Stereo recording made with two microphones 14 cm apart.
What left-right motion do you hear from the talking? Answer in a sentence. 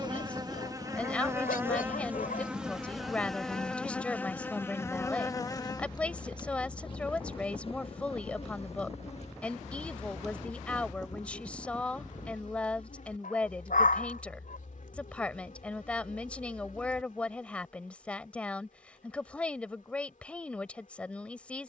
In this clip you hear the talking stay in one place.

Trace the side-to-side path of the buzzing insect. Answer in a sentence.
You can hear the buzzing insect go from the right side to the left.